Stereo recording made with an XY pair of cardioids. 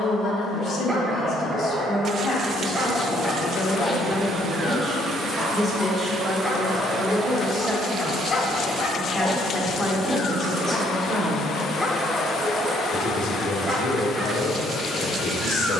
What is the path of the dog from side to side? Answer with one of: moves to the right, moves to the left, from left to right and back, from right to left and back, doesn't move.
from right to left and back.